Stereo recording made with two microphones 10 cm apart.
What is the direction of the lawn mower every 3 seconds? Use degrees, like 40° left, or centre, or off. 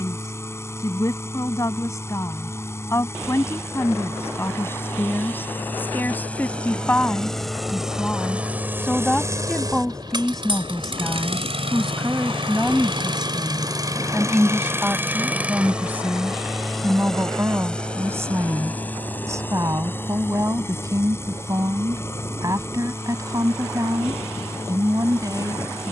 30° left, 20° left, centre, 50° right, 40° right, centre, 20° left, 30° left, 30° left.